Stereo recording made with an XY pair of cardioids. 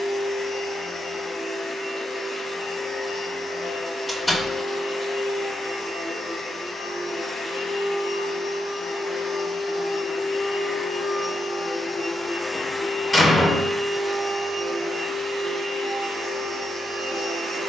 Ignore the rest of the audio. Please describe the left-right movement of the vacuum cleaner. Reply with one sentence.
In this clip you hear the vacuum cleaner travel towards the right.